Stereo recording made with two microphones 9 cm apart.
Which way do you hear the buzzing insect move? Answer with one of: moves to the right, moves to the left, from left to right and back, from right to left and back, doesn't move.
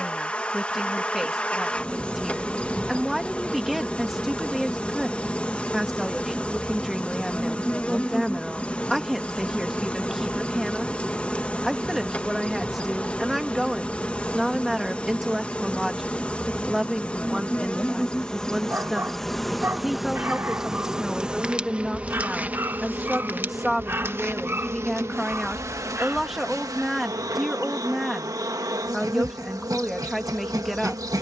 moves to the right.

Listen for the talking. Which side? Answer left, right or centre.
centre.